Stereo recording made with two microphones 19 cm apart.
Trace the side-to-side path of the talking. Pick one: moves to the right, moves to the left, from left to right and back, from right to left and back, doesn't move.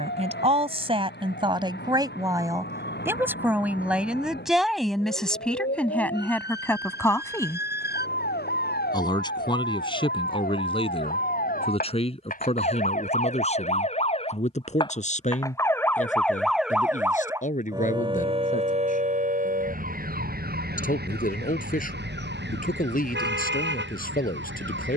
moves to the left.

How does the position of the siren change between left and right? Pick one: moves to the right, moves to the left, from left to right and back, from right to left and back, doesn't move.
moves to the right.